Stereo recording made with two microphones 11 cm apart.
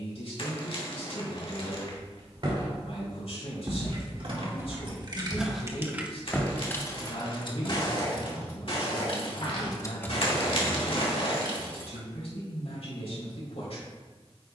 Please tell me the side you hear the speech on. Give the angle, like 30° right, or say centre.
70° left.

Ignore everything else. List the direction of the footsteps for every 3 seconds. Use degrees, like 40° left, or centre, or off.
50° right, 20° right, 40° left, 70° left, off.